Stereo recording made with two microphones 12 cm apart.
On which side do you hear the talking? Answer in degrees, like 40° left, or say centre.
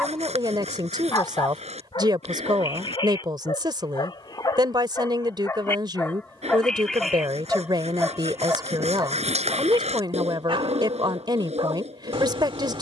40° right.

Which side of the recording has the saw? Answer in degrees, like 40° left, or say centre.
70° right.